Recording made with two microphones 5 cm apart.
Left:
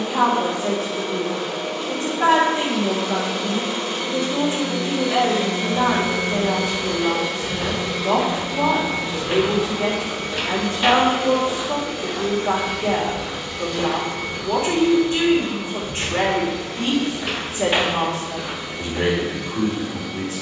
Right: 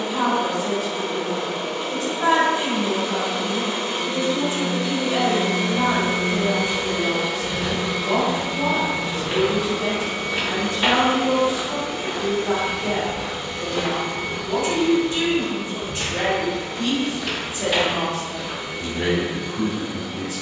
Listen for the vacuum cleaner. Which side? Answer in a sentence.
In this clip you hear the vacuum cleaner on the right.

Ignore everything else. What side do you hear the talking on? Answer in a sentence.
In this clip you hear the talking on the left.